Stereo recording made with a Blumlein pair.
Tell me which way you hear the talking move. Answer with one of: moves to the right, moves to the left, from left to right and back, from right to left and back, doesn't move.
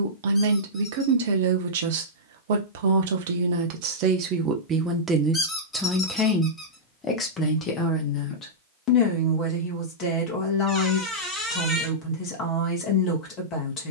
moves to the left.